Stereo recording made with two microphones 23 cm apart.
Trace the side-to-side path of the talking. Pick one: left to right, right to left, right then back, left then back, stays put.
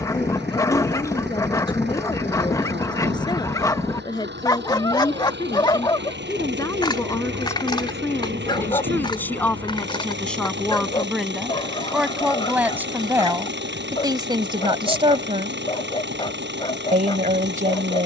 left to right.